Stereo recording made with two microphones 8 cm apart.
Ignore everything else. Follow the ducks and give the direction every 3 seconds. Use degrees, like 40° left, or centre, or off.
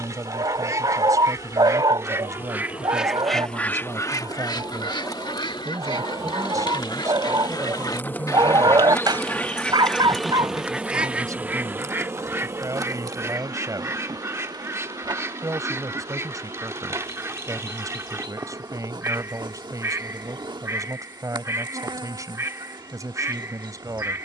40° right, 50° left, 60° left, centre, 30° right, 30° right, 30° right, 30° right.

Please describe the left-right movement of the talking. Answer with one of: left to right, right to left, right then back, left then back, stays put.
stays put.